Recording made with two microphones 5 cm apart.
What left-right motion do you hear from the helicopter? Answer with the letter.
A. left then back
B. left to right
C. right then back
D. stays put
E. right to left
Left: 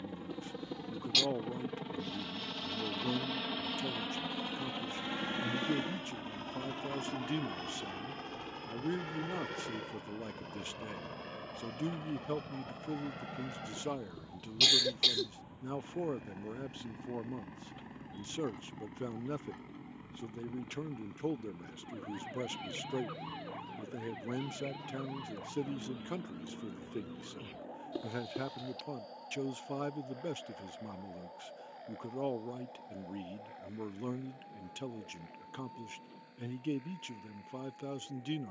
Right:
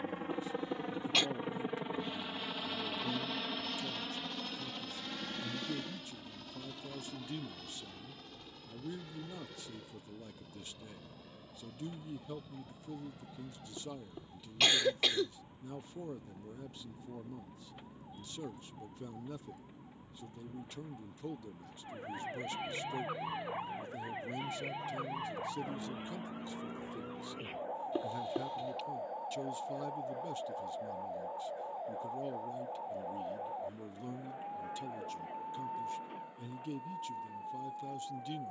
E.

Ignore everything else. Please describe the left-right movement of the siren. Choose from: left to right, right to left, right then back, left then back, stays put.
left to right.